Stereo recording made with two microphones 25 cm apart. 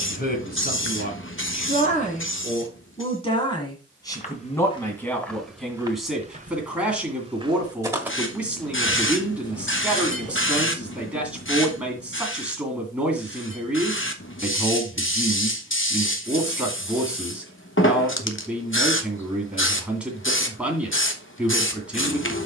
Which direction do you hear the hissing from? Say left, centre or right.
left.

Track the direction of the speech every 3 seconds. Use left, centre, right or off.
left, centre, centre, centre, centre, centre, centre, centre.